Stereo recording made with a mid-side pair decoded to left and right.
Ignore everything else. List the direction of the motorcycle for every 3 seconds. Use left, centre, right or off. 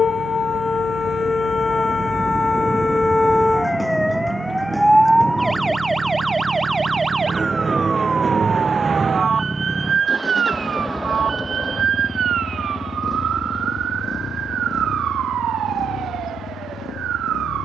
right, right, right, centre, left, left.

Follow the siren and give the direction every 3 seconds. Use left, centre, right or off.
left, centre, right, right, right, right.